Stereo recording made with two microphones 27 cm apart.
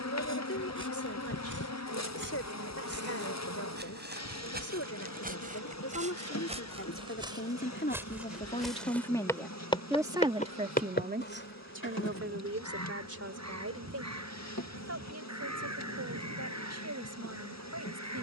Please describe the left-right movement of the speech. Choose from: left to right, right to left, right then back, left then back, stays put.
left to right.